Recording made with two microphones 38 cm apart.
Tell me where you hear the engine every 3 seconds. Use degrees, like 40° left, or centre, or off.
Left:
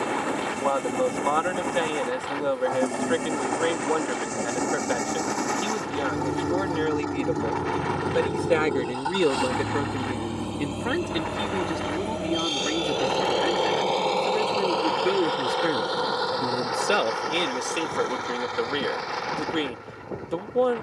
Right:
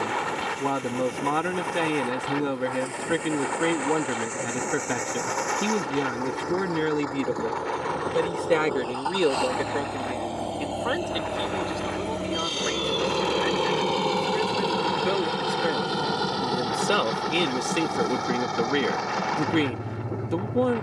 60° left, 60° left, 40° left, 20° left, 20° right, 40° right, 60° right.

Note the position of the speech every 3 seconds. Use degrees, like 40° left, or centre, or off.
40° right, 40° right, 20° right, 30° left, 50° left, 10° left, 30° right.